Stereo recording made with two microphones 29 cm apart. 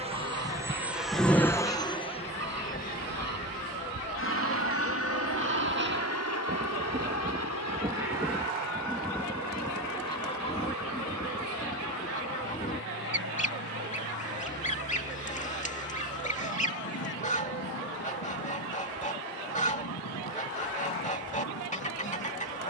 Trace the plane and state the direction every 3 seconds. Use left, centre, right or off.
centre, left, left, left, left, left, left, left.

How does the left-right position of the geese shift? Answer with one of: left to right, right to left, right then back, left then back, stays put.
right to left.